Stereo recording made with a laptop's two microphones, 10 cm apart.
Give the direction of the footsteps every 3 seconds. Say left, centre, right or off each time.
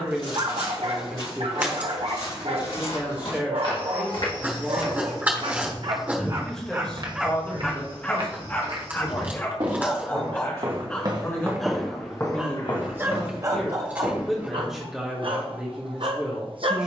left, left, right, right, left, off.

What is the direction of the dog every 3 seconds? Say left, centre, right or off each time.
right, right, centre, centre, right, right.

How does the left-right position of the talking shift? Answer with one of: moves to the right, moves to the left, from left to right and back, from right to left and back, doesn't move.
from right to left and back.